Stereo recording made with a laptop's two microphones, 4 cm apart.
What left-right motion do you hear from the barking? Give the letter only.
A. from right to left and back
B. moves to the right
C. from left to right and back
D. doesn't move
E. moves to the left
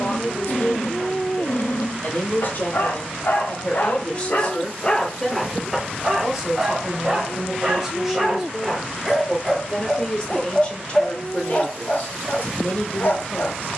C.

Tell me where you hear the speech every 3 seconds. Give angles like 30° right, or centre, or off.
50° left, 20° left, 10° right, 20° left, 40° left.